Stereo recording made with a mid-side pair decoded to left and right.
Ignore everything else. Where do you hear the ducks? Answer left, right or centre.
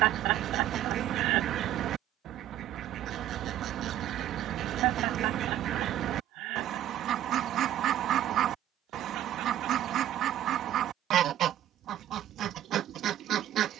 right.